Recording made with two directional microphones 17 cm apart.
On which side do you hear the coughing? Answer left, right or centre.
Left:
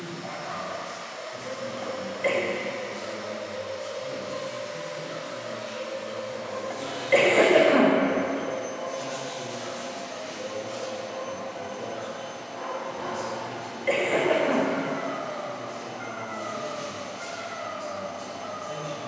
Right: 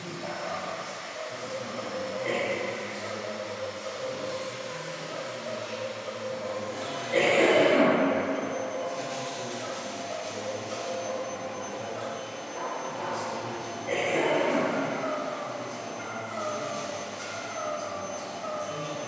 left.